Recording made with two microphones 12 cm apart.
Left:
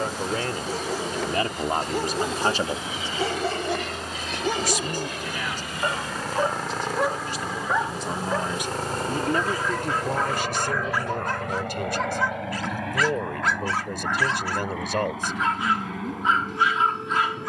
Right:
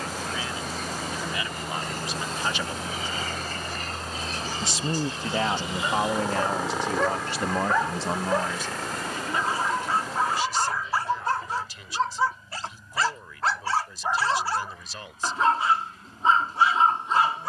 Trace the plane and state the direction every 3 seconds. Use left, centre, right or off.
right, right, centre, left, left, left.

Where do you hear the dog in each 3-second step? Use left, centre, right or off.
left, left, centre, right, right, right.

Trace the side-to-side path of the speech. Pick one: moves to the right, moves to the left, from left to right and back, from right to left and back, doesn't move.
from left to right and back.